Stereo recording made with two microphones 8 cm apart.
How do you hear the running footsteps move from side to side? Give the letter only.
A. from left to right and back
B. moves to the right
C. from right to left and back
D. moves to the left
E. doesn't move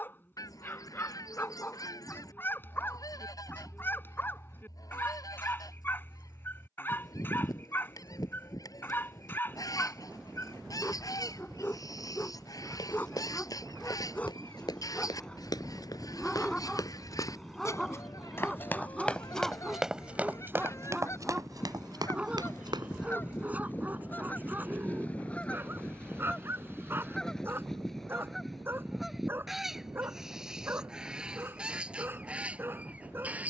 B.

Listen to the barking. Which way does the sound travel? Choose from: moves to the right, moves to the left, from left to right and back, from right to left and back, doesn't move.
moves to the right.